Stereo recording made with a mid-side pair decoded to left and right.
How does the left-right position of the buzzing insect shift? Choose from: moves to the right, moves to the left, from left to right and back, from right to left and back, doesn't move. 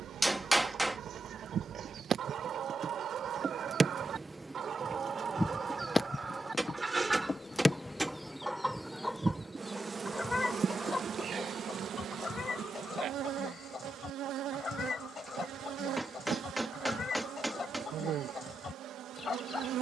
from right to left and back.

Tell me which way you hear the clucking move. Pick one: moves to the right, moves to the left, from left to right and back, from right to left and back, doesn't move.
moves to the left.